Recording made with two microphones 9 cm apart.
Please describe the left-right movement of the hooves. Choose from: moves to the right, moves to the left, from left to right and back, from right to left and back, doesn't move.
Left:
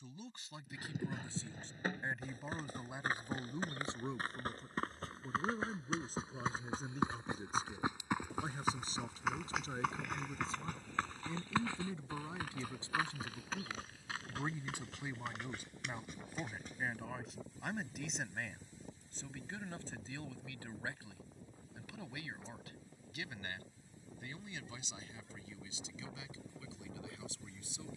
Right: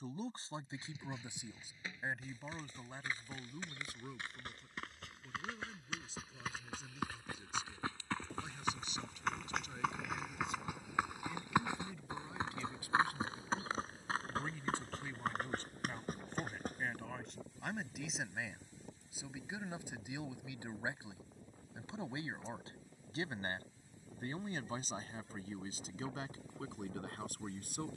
moves to the right.